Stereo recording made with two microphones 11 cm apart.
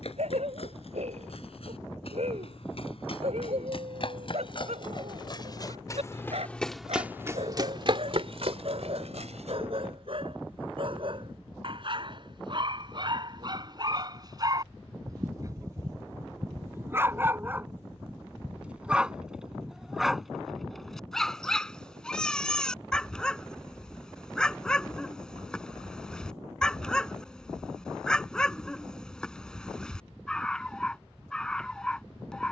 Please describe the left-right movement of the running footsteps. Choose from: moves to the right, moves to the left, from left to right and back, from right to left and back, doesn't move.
moves to the right.